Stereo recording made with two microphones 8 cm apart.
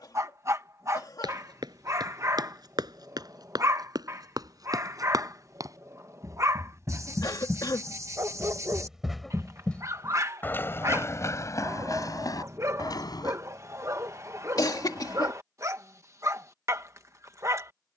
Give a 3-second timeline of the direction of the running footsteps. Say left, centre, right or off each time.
right, right, right, left, left, off.